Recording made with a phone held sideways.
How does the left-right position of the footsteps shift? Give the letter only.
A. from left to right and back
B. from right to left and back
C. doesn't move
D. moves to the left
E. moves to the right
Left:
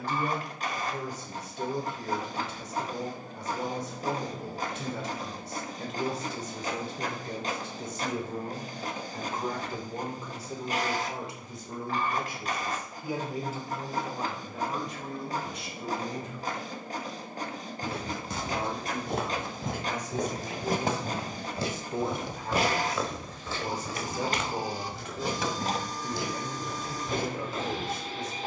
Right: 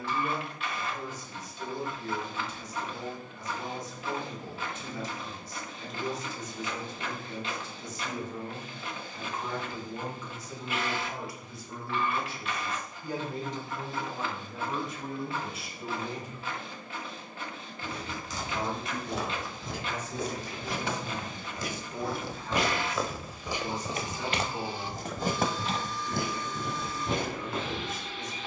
E.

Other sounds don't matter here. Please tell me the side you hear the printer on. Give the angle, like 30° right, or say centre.
40° left.